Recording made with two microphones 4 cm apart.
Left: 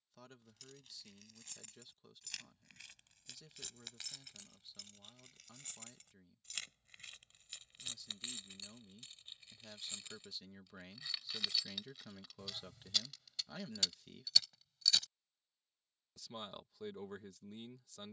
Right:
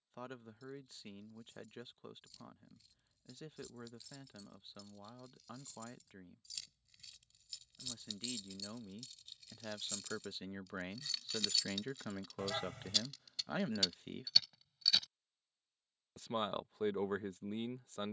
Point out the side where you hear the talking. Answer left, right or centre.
right.